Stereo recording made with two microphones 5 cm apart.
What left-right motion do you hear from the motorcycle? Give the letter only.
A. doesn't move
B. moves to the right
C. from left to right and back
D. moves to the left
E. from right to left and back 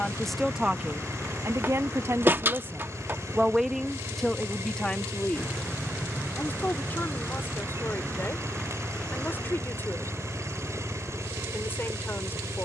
A.